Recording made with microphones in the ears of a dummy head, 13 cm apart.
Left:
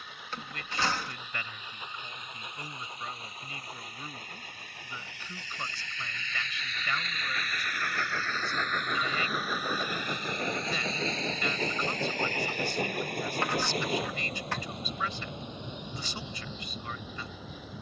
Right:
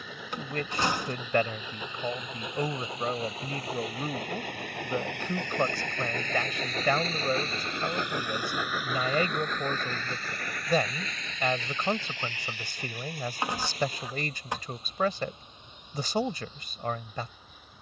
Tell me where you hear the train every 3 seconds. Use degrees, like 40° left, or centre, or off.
70° right, 60° right, 20° right, 20° left, 50° left, 60° left.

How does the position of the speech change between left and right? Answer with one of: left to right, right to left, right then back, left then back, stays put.
stays put.